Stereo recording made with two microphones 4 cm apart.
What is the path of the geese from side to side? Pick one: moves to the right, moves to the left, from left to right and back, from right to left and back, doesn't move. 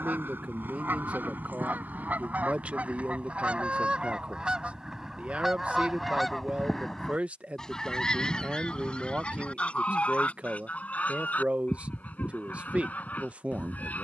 moves to the left.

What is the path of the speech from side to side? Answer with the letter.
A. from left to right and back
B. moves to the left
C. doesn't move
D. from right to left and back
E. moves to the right
C.